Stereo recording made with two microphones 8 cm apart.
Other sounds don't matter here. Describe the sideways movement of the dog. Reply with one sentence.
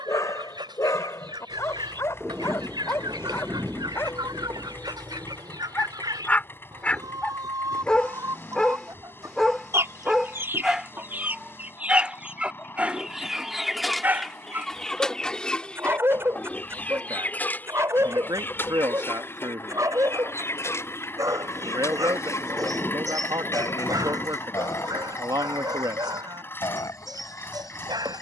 In this clip you hear the dog go from the left side to the right.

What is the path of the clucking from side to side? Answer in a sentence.
In this clip you hear the clucking travel towards the left.